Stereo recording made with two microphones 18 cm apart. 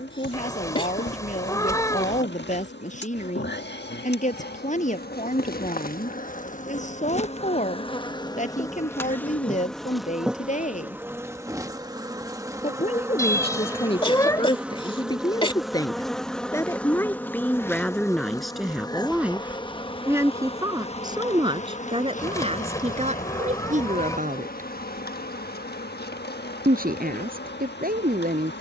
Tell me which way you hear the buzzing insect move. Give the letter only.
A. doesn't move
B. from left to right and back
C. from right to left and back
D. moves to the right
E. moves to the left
B.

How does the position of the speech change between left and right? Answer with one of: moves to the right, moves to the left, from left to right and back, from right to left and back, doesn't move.
moves to the right.